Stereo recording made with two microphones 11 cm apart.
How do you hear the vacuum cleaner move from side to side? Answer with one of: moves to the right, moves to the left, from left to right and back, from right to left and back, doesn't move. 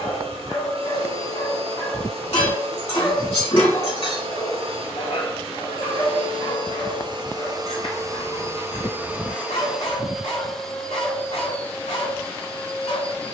moves to the left.